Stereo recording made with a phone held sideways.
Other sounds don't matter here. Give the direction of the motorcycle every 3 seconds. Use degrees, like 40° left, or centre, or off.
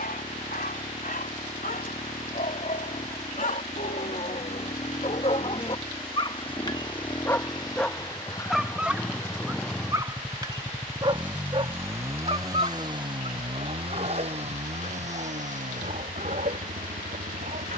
50° left, 50° left, 30° left, centre, 30° right, 60° right.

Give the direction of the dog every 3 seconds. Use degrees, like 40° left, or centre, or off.
70° left, 50° left, 10° left, 30° right, 50° right, 60° right.